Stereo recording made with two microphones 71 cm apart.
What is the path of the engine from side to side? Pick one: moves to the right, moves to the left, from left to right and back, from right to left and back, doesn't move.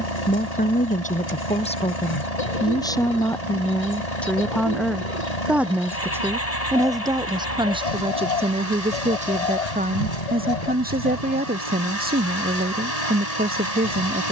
doesn't move.